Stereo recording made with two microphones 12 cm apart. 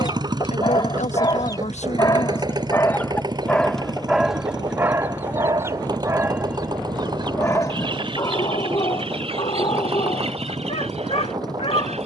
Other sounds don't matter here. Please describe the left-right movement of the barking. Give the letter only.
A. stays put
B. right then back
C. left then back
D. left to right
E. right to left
B.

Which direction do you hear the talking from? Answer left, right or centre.
left.